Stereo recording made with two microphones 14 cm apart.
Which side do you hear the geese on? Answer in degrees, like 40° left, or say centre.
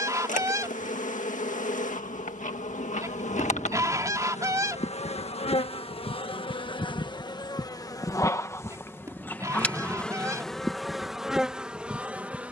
20° right.